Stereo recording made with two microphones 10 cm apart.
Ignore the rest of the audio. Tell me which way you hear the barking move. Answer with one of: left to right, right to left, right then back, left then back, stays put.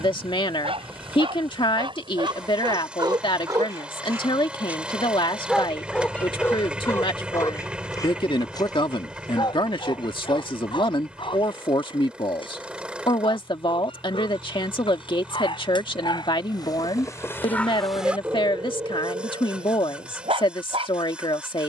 left then back.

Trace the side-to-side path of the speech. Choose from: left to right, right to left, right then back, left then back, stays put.
stays put.